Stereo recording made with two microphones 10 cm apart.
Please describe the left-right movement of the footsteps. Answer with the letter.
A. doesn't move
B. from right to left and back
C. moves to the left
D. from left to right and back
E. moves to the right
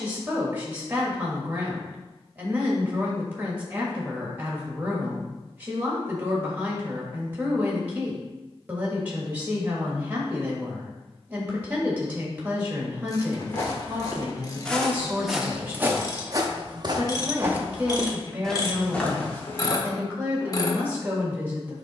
D.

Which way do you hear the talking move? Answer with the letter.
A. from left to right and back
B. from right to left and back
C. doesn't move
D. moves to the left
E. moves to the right
C.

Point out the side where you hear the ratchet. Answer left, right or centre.
left.